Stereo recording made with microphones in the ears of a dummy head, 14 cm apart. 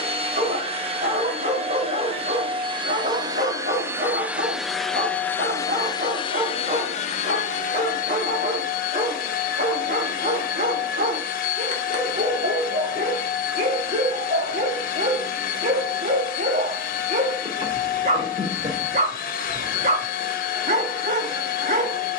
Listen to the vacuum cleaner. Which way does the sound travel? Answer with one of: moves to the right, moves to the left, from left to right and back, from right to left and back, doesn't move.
moves to the left.